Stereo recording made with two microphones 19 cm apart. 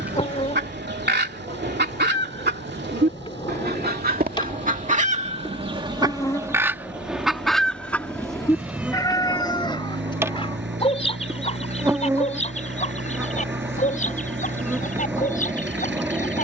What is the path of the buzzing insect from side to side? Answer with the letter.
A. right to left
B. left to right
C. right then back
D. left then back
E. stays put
B.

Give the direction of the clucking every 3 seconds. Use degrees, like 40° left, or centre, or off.
70° right, 50° right, centre, 30° left, 40° left, 50° left.